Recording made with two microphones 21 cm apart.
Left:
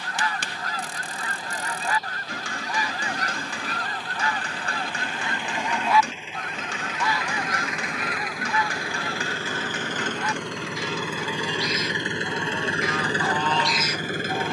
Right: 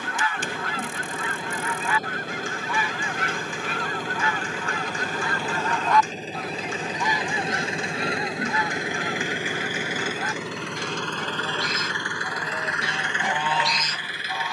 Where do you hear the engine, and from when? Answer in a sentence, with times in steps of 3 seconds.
You can hear the engine on the right from 0 s, in the centre from 9 s and on the left from 12 s.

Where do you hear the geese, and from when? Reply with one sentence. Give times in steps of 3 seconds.
You can hear the geese on the left from 0 s, on the right from 6 s and in the centre from 12 s.